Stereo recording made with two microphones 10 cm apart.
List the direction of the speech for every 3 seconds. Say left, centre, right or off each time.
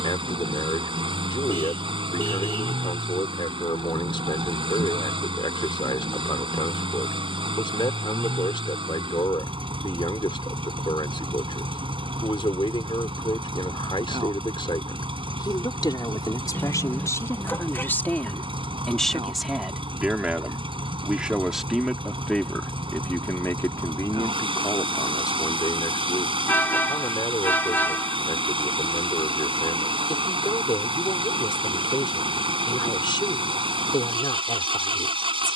left, left, left, left, left, left, centre, centre, left, left, left, left.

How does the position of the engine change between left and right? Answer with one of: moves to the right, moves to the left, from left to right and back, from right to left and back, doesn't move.
doesn't move.